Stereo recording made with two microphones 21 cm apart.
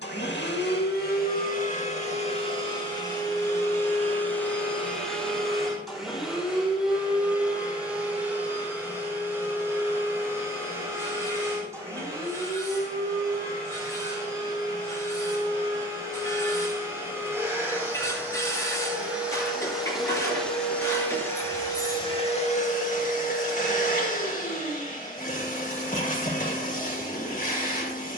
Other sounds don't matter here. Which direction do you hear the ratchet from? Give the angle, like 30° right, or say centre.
20° left.